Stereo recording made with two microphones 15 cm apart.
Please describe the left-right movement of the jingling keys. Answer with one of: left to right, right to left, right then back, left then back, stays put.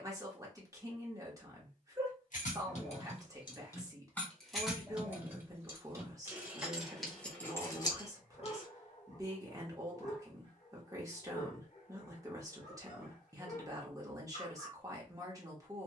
right then back.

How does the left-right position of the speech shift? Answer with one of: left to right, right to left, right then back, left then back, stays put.
stays put.